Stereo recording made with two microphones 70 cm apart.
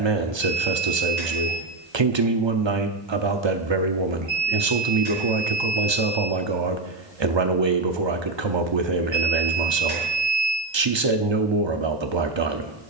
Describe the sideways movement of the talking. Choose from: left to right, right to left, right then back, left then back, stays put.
stays put.